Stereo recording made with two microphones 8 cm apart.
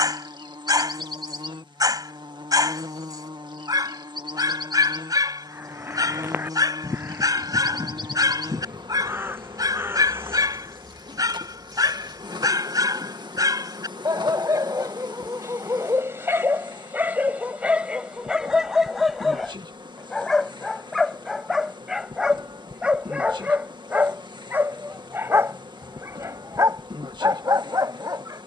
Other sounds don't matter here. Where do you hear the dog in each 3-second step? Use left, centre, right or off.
right, right, right, right, right, right, centre, centre, right, right.